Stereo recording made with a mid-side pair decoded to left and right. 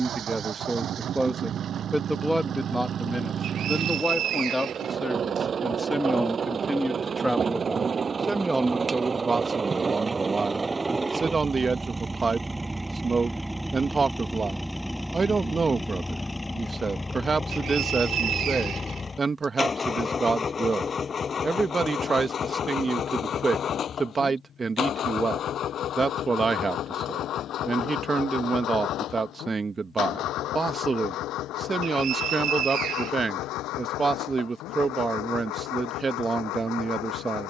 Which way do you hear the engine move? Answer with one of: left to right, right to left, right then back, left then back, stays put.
right to left.